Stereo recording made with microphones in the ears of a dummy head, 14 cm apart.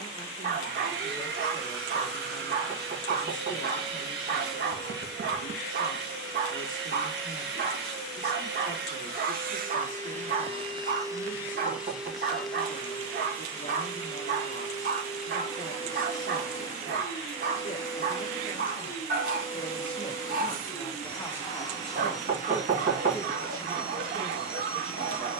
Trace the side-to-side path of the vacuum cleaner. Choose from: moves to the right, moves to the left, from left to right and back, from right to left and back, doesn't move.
moves to the left.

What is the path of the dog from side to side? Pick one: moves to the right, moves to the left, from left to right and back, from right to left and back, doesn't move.
doesn't move.